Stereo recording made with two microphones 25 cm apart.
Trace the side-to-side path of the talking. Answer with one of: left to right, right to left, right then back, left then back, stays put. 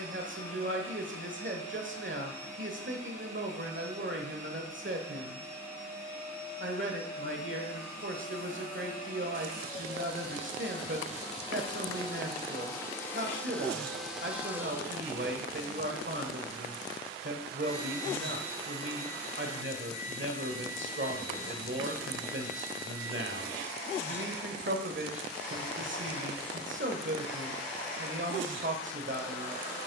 stays put.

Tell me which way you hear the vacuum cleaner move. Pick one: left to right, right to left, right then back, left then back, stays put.
right then back.